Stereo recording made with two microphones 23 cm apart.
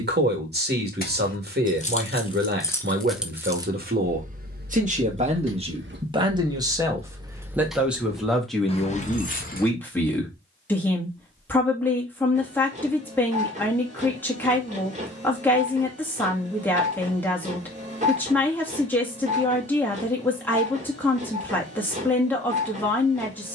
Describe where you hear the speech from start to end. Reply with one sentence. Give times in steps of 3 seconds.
You can hear the speech on the right from 0 s and in the centre from 6 s.